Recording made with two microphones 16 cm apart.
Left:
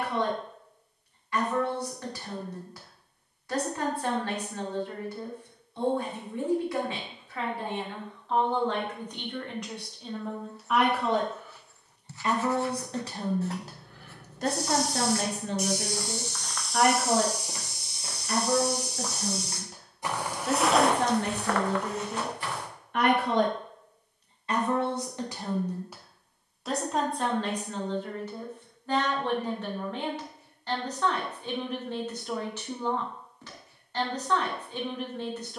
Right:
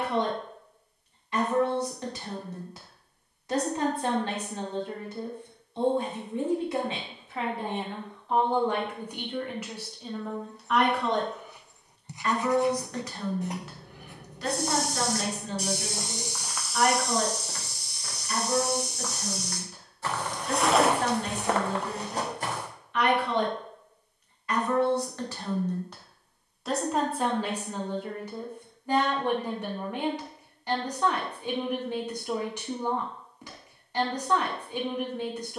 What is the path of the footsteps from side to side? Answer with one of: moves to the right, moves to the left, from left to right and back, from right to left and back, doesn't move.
from right to left and back.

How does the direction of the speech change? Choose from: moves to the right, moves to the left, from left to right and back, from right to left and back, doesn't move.
from right to left and back.